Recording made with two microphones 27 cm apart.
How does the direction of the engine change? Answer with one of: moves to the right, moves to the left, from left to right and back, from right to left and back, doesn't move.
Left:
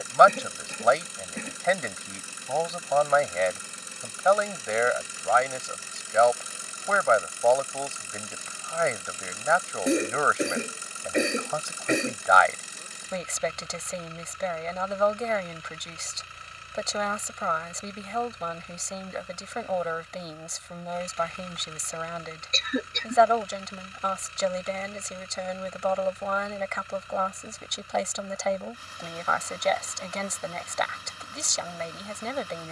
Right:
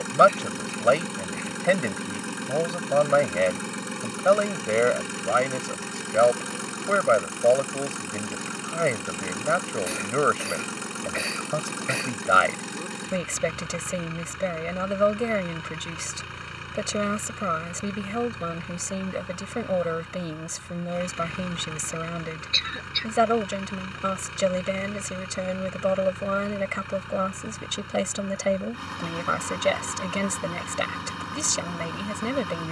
doesn't move.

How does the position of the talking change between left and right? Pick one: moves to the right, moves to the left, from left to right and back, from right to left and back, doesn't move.
doesn't move.